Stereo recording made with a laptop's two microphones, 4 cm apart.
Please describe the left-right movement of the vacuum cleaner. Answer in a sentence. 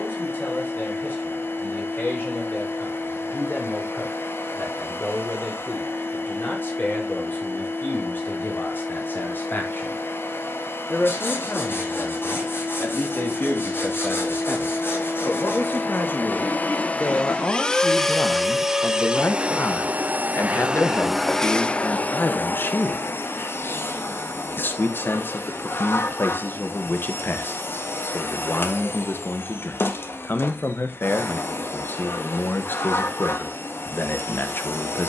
In this clip you hear the vacuum cleaner go right and come back.